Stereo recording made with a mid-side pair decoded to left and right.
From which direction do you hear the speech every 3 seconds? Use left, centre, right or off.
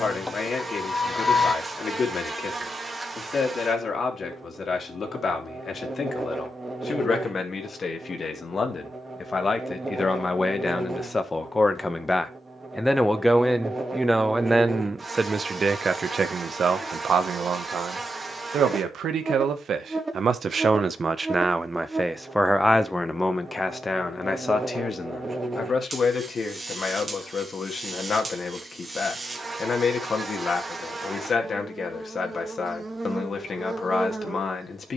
left, left, left, left, centre, right, right, centre, left, left, left, left.